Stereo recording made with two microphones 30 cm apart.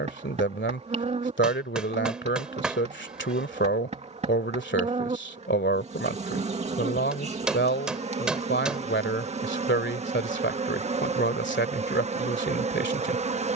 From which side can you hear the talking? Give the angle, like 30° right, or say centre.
40° left.